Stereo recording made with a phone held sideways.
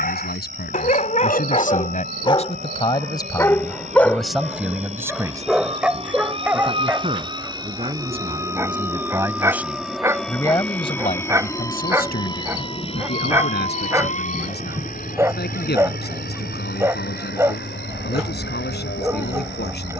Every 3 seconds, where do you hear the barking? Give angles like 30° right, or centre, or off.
40° left, centre, 10° right, 20° right, 20° right, 20° right, 20° right.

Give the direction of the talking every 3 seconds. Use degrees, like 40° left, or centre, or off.
50° left, centre, 30° right, 20° left, 70° left, 80° left, 80° left.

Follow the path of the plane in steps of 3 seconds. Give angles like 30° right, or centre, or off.
60° right, 50° right, 30° right, 10° left, 40° left, 60° left, 60° left.